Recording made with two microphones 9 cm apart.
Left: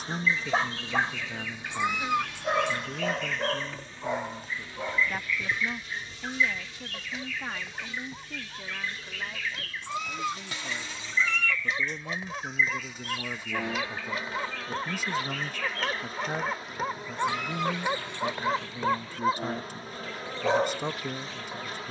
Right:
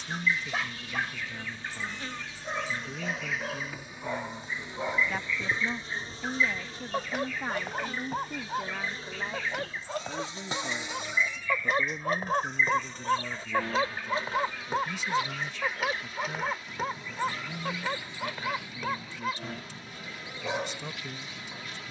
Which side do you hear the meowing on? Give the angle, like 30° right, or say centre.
70° left.